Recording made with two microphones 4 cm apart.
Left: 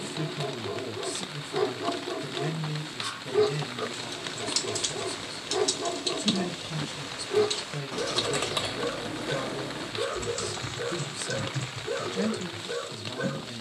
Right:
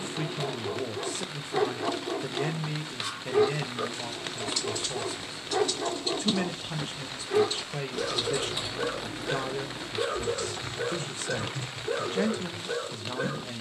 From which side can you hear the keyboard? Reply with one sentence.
In this clip you hear the keyboard on the left.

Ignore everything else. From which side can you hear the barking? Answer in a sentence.
You can hear the barking on the right.